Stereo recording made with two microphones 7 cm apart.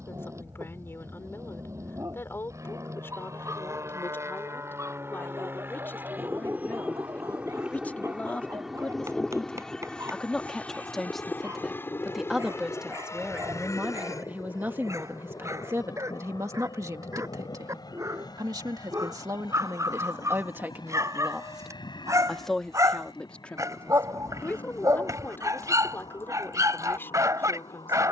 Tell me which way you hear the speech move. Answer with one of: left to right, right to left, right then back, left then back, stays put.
right then back.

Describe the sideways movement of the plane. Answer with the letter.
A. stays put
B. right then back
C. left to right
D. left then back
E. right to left
E.